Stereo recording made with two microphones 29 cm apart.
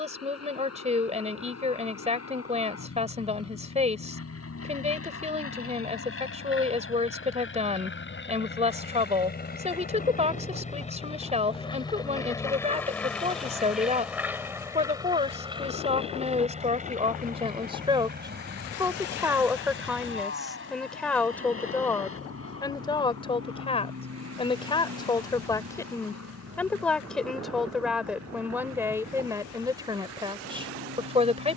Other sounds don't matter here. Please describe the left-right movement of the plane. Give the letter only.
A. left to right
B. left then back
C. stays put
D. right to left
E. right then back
A.